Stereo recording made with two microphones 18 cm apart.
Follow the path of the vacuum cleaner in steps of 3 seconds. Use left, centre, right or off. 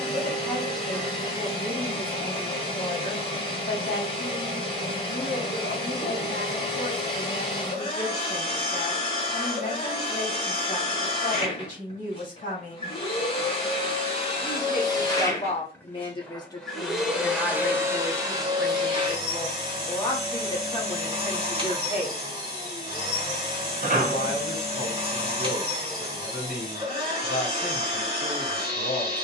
left, left, left, left, left, centre, right, right, right, right.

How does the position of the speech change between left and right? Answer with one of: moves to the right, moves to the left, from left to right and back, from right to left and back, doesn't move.
from left to right and back.